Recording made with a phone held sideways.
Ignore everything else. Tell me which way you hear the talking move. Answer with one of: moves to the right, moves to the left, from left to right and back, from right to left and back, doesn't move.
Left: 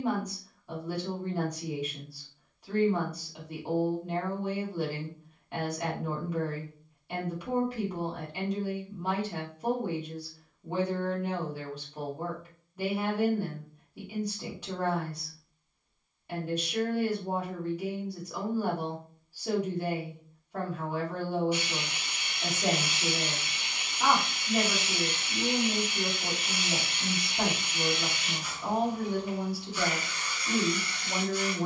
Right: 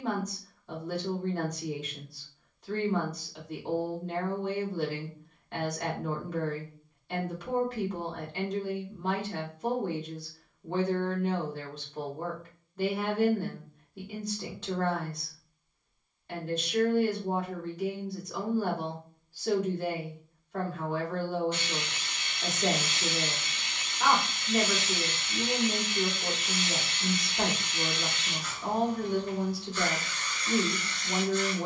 doesn't move.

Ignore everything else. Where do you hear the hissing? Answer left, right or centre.
centre.